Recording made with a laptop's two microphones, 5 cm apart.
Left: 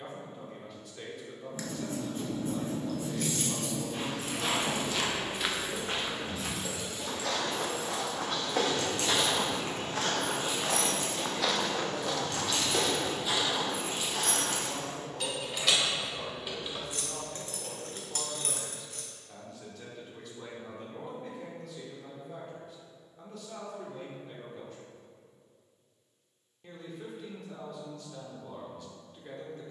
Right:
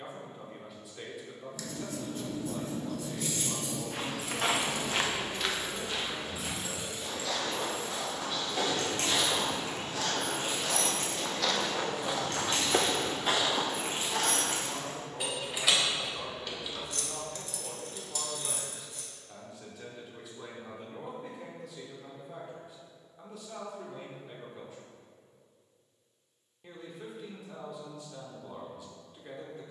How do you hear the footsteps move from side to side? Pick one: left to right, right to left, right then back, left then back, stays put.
left then back.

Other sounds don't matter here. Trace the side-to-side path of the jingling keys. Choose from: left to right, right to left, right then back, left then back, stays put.
right then back.